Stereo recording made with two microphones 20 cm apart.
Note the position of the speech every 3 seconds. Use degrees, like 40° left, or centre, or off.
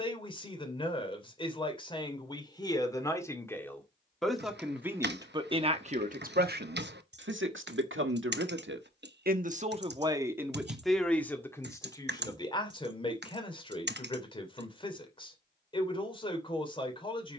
20° left, 10° right, 60° right, 10° right, 20° left, 30° left.